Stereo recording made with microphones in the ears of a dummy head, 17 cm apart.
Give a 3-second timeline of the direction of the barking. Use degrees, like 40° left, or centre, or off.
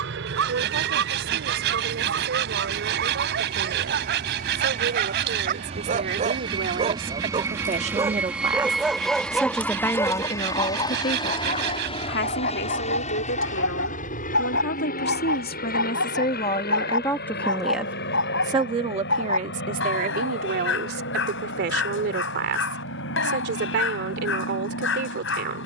60° right, 50° right, 20° right, 10° left, 50° left, 70° left, 70° left, 70° left, 70° left.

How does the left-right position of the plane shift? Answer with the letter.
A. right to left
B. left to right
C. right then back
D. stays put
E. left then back
A.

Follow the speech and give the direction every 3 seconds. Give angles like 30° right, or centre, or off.
60° right, 60° right, 40° right, 30° left, 60° left, 30° left, 40° right, 60° right, 60° right.